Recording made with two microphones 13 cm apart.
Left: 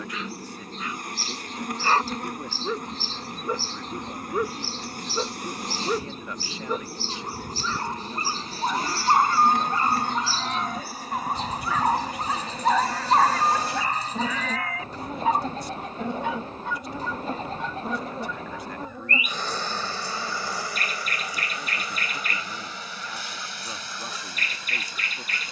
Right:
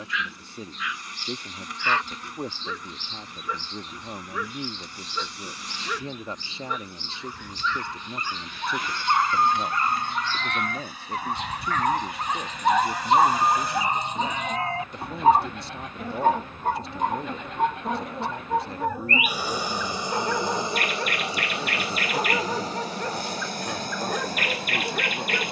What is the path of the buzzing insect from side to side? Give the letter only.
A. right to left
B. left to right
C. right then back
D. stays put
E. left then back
B.